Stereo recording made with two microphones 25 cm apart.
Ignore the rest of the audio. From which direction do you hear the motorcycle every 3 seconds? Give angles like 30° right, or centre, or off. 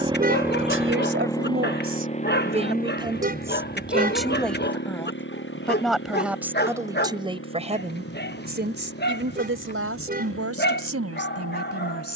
10° left, 40° left, 50° left, 60° left.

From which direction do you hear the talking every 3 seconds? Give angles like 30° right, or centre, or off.
40° right, centre, 20° right, 70° right.